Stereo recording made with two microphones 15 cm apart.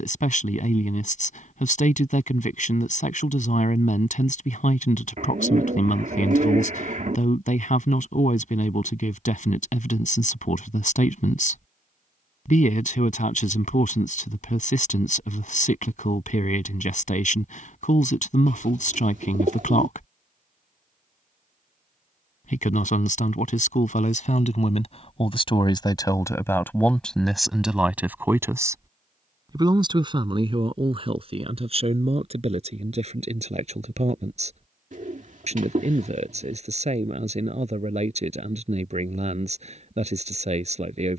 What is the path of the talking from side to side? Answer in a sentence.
You can hear the talking go from the left side to the right.